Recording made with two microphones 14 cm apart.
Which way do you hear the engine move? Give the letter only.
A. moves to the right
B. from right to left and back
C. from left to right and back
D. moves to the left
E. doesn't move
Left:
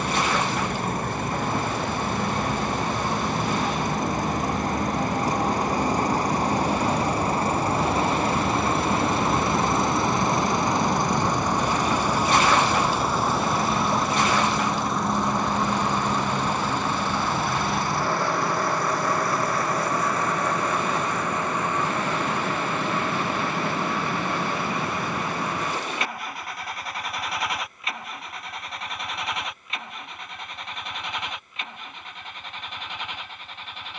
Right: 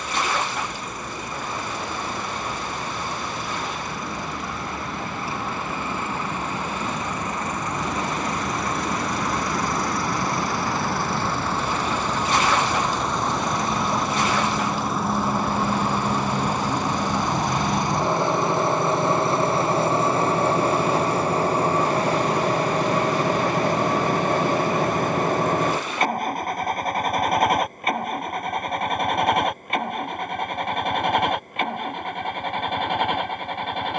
A.